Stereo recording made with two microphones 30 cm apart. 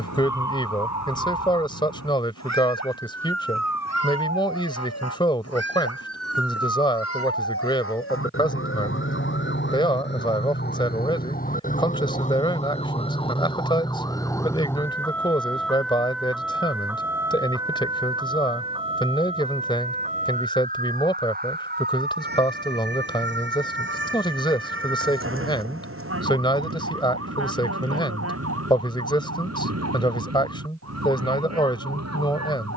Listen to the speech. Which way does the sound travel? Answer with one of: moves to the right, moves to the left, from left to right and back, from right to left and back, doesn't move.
doesn't move.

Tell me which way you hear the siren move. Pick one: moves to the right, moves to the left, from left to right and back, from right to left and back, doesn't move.
moves to the right.